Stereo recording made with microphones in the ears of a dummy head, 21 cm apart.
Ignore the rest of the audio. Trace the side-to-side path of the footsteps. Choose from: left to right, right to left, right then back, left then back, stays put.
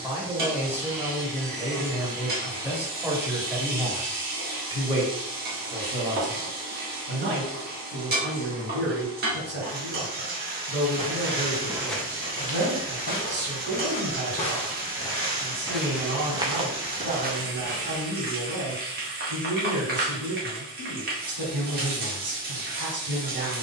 left then back.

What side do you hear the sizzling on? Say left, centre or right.
right.